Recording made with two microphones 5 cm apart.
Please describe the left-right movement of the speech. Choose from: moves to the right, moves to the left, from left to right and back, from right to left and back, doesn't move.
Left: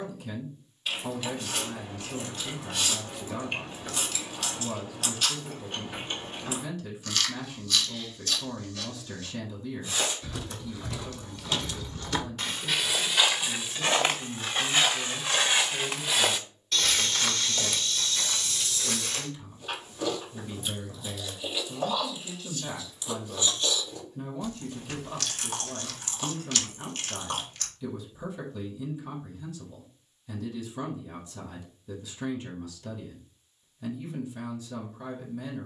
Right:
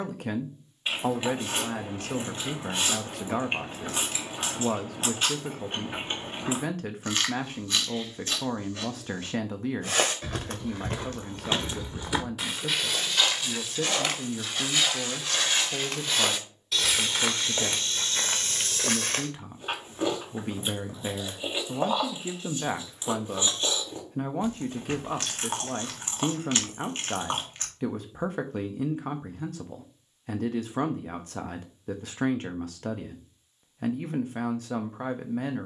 doesn't move.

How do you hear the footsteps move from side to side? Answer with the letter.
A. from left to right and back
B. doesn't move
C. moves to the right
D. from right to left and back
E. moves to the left
D.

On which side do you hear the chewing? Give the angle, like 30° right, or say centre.
30° right.